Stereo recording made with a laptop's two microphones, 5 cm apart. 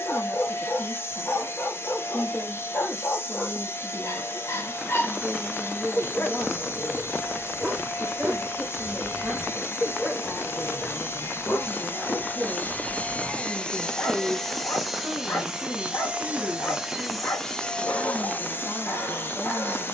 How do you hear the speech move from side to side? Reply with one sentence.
You can hear the speech go right and come back.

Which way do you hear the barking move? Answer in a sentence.
You can hear the barking move from left to right and back again.